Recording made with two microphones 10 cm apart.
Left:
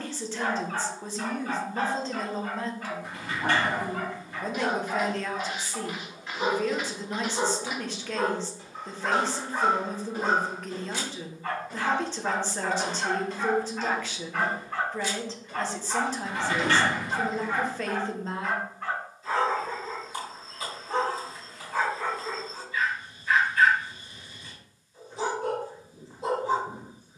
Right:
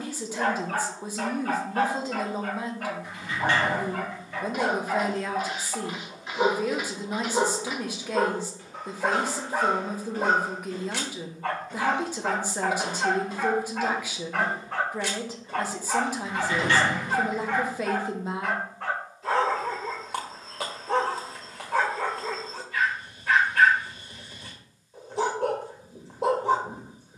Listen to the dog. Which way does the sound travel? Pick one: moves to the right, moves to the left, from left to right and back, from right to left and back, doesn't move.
doesn't move.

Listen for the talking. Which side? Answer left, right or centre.
centre.